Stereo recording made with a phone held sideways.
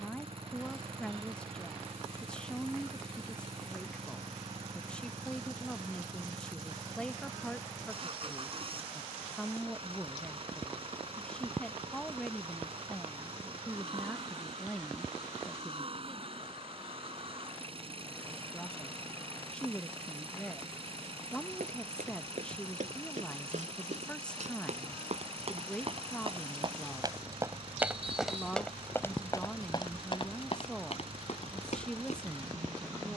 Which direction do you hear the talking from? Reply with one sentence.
In this clip you hear the talking in the centre.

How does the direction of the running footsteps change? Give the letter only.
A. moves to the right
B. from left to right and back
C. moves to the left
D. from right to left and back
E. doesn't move
C.